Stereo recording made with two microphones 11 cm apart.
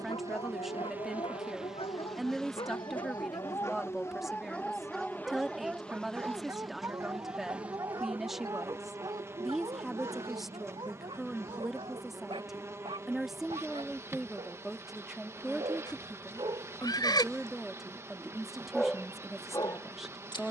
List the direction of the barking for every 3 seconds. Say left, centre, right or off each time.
left, centre, right, right, right, right, left.